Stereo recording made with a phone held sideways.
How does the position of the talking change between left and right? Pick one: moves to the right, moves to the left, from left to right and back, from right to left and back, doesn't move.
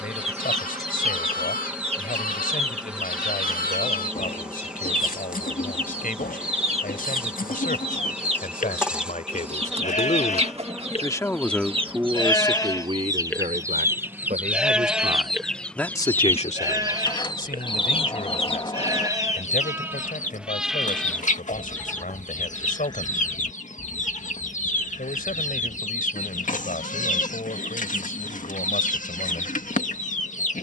from left to right and back.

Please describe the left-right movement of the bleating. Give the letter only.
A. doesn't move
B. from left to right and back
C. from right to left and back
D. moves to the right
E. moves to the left
B.